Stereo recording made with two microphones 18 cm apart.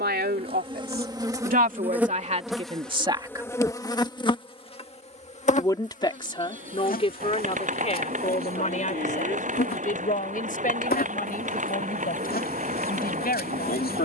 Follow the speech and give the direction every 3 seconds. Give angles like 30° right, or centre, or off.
50° right, centre, 40° left, 50° left, 60° left.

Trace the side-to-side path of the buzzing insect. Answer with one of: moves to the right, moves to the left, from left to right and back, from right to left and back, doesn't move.
moves to the left.